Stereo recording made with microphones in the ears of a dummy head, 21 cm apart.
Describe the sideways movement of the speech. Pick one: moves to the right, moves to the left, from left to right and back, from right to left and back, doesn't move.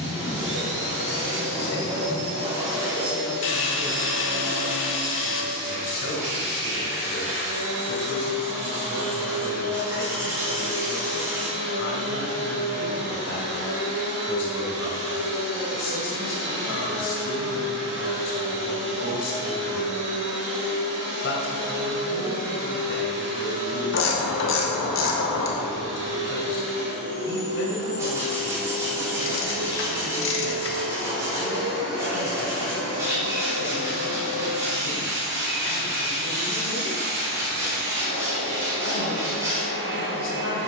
doesn't move.